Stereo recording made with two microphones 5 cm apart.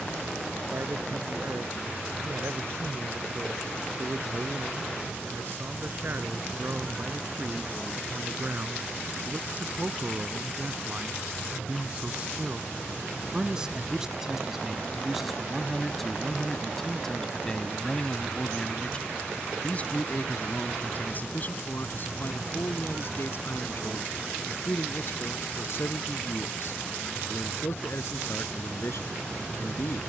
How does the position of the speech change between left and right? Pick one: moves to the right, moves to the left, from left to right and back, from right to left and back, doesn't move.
moves to the left.